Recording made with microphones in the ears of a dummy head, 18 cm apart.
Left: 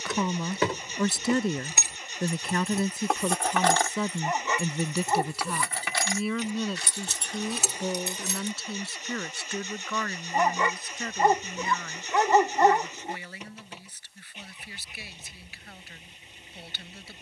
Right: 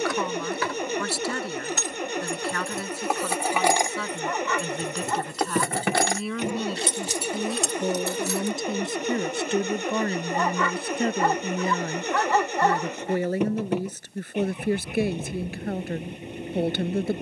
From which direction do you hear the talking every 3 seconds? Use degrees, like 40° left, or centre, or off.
20° left, 10° left, 10° right, 30° right, 40° right, 50° right.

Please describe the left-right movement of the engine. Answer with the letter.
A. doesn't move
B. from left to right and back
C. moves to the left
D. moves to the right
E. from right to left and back
A.